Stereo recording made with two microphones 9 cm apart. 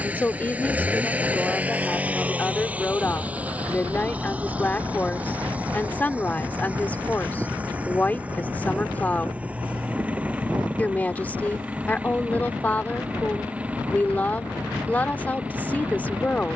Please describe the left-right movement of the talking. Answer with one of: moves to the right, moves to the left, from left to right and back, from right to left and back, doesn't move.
doesn't move.